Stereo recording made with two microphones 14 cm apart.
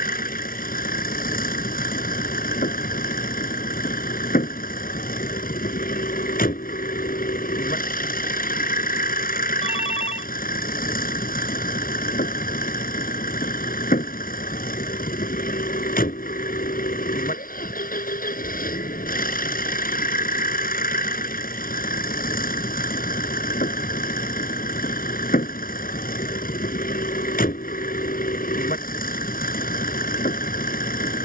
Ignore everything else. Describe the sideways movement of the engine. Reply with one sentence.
You can hear the engine stay put.